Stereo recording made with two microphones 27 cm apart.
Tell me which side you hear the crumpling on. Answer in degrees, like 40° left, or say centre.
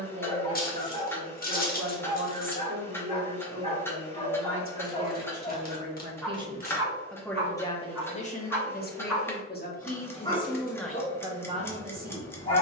30° left.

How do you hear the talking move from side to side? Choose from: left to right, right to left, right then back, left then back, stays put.
left then back.